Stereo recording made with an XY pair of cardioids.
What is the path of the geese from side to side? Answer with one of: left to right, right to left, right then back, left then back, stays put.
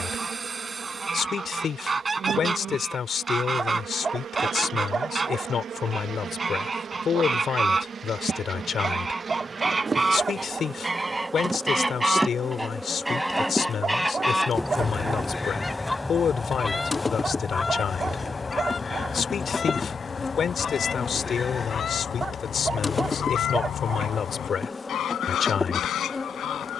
right to left.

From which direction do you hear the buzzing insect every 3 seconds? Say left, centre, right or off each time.
right, right, right, right, centre, left, left, left, left.